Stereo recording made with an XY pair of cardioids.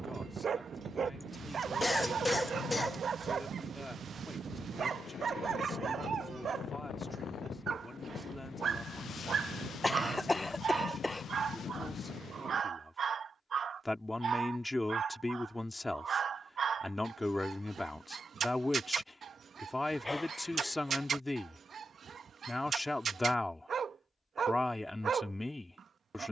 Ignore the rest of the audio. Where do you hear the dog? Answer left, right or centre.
right.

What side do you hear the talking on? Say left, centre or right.
centre.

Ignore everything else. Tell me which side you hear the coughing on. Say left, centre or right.
centre.